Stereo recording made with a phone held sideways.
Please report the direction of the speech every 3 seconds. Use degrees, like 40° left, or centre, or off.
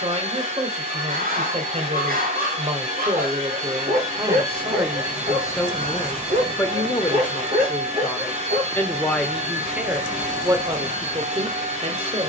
40° right, 20° right, 20° left, 20° right.